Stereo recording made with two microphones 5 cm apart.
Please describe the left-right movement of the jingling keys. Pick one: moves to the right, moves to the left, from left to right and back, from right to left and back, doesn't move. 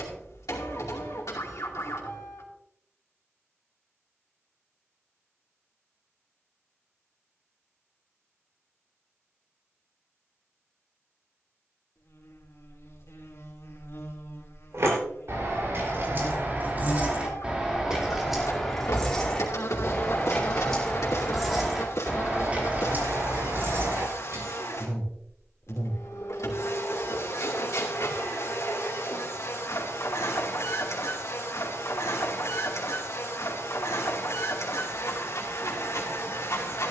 from right to left and back.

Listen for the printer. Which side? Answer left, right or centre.
left.